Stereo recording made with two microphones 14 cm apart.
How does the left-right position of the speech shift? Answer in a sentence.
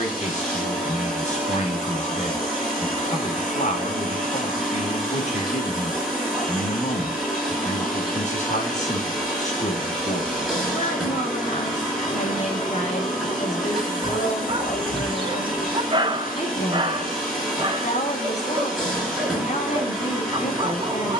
In this clip you hear the speech stay in one place.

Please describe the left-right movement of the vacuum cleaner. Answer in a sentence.
In this clip you hear the vacuum cleaner stay in one place.